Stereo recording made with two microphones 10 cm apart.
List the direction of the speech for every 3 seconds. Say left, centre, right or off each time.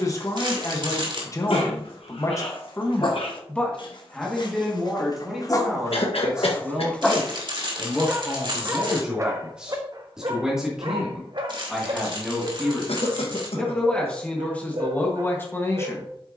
left, centre, centre, centre, centre, left.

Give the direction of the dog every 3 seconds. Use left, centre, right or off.
left, left, centre, right, right, right.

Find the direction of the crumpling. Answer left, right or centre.
right.